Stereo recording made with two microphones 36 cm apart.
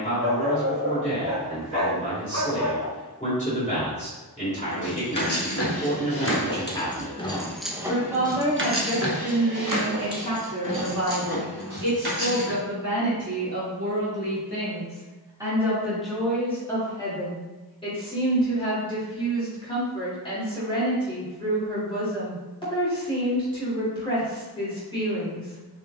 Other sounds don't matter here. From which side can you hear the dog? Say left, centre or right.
right.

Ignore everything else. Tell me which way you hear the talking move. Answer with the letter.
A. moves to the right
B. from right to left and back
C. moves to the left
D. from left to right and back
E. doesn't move
D.